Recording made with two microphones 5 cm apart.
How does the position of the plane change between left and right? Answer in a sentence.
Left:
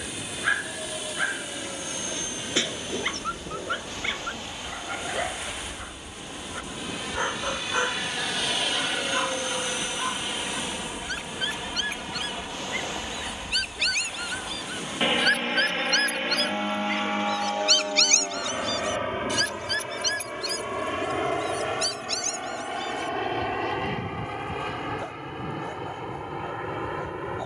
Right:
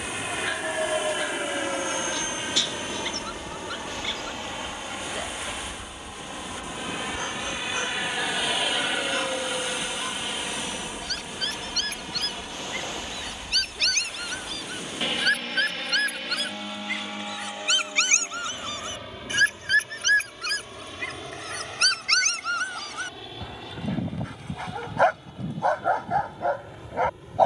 In this clip you hear the plane move from right to left.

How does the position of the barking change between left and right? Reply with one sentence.
You can hear the barking go from the left side to the right.